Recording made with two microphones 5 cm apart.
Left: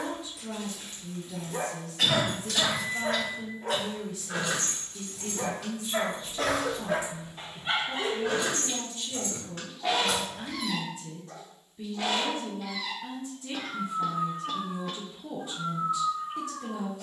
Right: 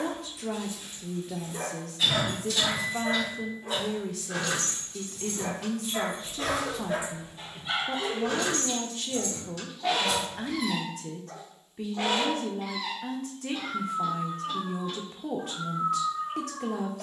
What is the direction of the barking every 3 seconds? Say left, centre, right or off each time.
left, left, left, centre, right, right.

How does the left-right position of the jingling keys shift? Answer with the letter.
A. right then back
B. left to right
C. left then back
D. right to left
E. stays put
A.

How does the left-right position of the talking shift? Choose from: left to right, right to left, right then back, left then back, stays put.
stays put.